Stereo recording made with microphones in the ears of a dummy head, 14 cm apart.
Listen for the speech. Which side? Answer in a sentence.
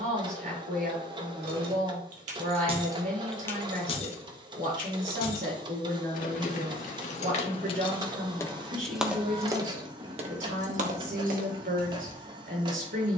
In this clip you hear the speech on the right.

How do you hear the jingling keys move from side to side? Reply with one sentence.
In this clip you hear the jingling keys go left and come back.